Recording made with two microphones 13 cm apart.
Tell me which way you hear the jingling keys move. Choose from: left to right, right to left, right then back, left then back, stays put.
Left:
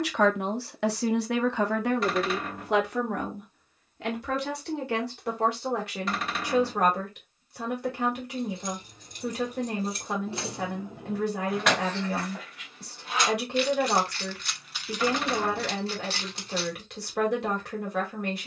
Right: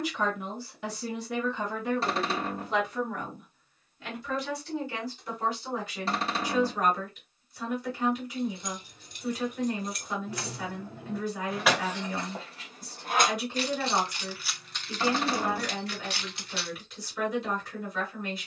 right then back.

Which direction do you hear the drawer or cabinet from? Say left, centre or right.
right.